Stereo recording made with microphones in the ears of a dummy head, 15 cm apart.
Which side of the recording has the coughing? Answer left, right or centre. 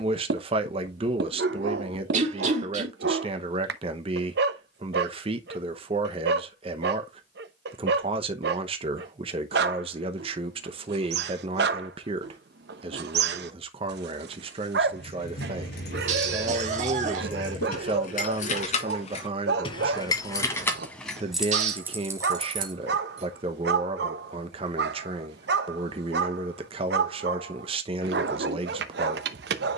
right.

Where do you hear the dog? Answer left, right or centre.
right.